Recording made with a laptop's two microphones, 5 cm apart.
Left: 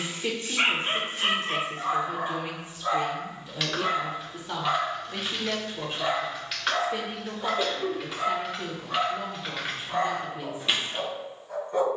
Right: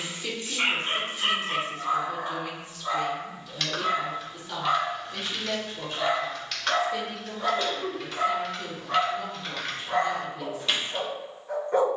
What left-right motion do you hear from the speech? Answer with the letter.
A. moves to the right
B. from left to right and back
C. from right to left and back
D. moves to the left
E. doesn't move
E.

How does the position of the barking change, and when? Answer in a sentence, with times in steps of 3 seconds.
You can hear the barking on the left from 0 s, in the centre from 3 s and on the right from 6 s.